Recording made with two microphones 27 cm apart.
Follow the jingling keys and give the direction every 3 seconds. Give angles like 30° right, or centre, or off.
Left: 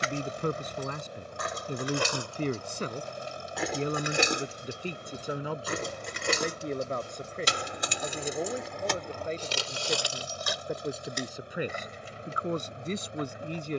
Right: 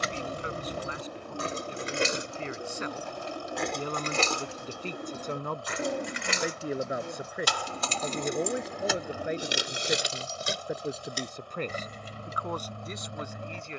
30° right, 20° left, 20° left, 30° right, 50° right.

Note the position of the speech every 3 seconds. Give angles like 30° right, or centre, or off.
50° left, 10° left, 10° right, 10° right, 30° left.